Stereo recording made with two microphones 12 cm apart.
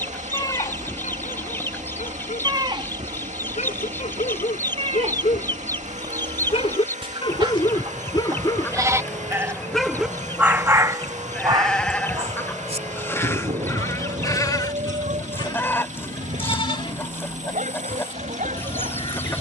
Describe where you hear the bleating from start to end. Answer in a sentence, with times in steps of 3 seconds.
In this clip you hear the bleating in the centre from 0 s, on the right from 3 s, in the centre from 9 s and on the left from 12 s.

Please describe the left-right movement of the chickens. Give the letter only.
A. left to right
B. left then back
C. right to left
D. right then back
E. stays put
E.